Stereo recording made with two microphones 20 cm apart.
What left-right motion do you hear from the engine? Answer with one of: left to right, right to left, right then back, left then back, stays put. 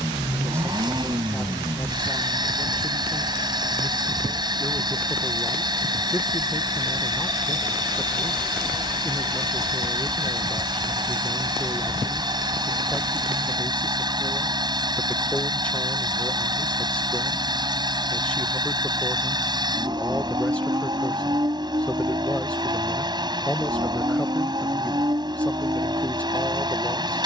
stays put.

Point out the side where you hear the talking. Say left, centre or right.
centre.